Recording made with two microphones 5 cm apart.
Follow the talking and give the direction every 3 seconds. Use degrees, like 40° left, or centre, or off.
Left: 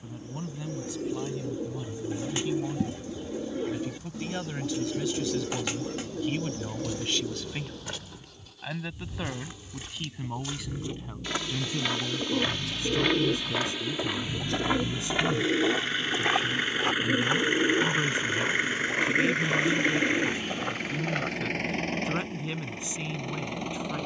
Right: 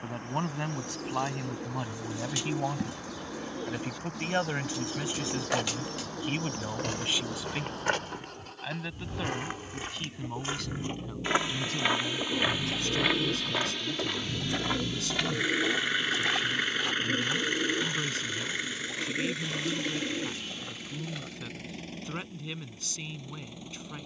60° right, 40° right, 10° right, 10° left, 20° left, 20° left, 20° left, 20° left.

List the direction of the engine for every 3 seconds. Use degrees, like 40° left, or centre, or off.
60° right, 60° right, 60° right, 50° right, 30° right, centre, 50° left, 70° left.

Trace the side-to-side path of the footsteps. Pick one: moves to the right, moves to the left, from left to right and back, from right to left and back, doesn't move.
moves to the left.